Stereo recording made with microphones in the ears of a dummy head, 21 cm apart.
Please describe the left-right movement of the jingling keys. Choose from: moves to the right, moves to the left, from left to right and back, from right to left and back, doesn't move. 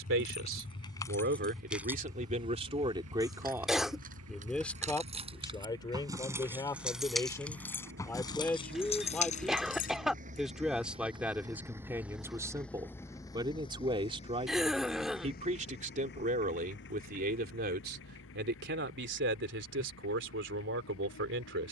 from left to right and back.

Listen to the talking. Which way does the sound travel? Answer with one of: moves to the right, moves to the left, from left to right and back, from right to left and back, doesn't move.
from right to left and back.